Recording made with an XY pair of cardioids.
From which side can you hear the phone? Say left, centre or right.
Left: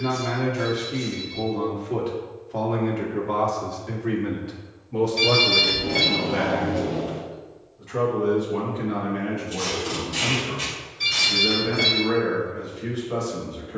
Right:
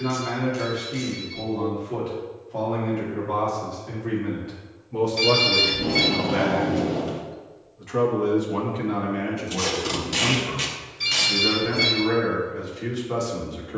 centre.